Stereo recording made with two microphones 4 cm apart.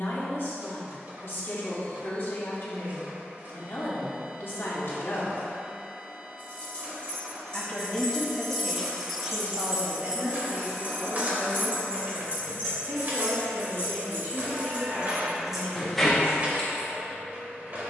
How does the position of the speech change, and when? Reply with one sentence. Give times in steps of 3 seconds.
You can hear the speech on the left from 0 s, in the centre from 6 s and on the right from 9 s.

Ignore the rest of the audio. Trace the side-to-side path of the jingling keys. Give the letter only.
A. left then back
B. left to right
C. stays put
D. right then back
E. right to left
D.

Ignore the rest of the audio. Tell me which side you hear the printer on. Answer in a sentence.
You can hear the printer on the right.